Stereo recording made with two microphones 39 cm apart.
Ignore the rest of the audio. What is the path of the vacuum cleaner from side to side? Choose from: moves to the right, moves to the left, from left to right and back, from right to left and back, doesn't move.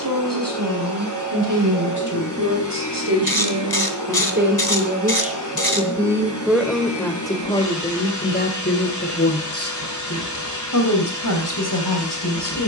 doesn't move.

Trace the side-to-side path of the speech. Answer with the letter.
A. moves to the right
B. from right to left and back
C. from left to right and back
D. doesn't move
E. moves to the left
E.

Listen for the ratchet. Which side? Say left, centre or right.
left.